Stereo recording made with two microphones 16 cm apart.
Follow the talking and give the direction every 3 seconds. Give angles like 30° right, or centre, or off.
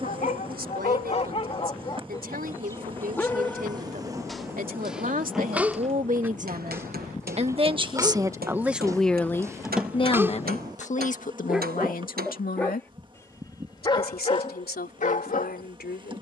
70° right, 60° right, 30° right, 40° left, 70° left, 80° left.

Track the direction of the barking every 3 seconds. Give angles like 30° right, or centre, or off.
40° left, centre, 20° right, 10° right, 30° left, 60° left.